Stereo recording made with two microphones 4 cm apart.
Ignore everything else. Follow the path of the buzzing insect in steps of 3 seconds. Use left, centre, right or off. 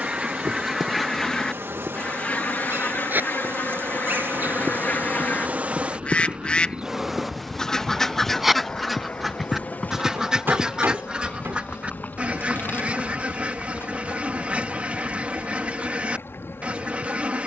right, right, centre, left, left, left.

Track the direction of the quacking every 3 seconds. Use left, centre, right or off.
centre, left, centre, right, right, right.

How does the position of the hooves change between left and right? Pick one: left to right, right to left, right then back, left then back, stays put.
right to left.